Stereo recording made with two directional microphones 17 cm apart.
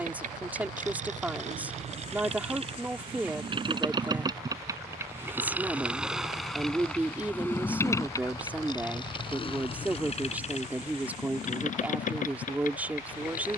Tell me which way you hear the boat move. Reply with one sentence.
In this clip you hear the boat move to the left.